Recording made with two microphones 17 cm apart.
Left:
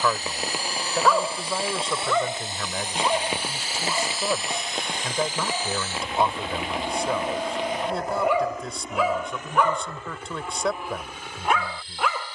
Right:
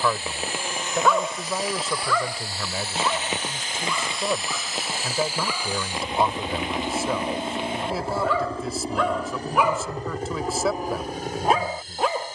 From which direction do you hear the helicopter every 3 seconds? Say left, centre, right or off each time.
left, centre, right, right.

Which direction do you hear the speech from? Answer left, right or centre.
centre.